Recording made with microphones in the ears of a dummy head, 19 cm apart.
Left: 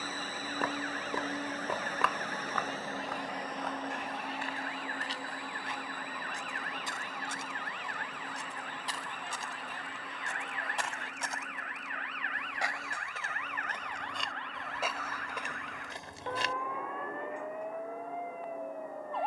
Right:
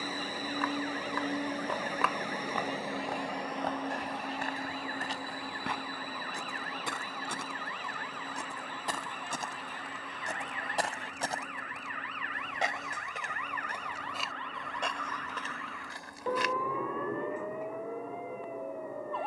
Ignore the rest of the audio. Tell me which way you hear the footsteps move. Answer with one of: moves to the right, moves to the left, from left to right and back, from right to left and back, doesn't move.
from left to right and back.